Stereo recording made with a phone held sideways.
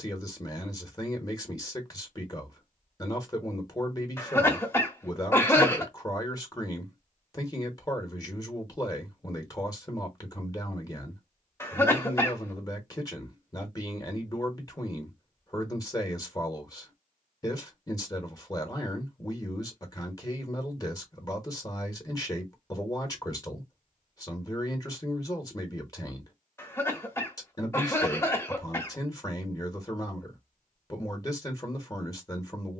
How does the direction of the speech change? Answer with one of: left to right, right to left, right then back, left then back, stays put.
stays put.